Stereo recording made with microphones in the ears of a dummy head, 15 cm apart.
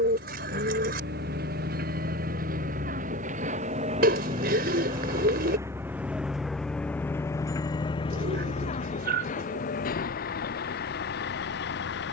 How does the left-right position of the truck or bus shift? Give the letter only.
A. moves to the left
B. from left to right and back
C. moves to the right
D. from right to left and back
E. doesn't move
A.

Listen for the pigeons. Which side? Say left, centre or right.
right.